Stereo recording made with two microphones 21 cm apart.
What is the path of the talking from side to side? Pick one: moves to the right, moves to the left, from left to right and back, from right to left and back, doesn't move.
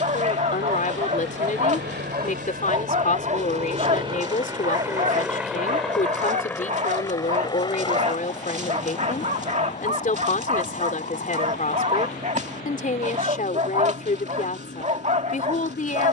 doesn't move.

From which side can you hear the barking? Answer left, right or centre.
right.